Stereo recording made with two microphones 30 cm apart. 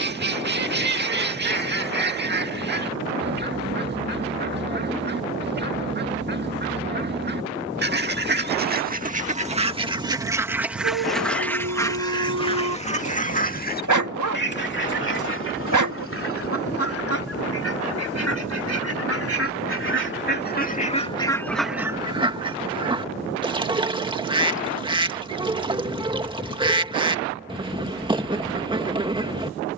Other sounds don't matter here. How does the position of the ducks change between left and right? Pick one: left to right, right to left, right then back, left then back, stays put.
left then back.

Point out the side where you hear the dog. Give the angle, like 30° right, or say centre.
80° right.